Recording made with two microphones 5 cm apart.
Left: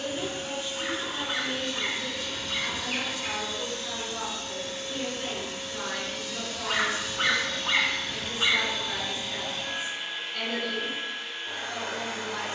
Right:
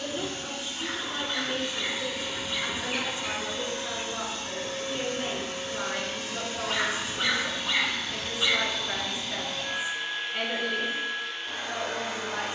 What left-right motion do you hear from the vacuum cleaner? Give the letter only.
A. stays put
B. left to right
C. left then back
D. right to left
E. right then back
E.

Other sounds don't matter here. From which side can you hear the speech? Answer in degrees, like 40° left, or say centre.
20° right.